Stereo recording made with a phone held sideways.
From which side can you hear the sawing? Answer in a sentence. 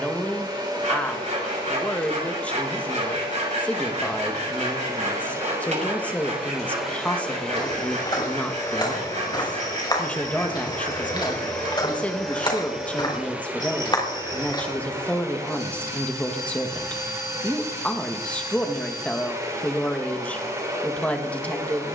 You can hear the sawing on the right.